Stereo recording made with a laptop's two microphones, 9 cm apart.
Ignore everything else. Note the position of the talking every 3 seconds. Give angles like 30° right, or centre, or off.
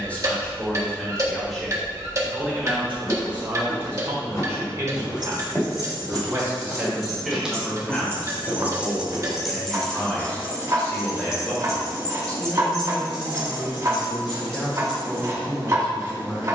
centre, 30° right, centre, 10° left, 10° left, 10° left.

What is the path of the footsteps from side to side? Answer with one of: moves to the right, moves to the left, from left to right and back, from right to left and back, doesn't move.
moves to the right.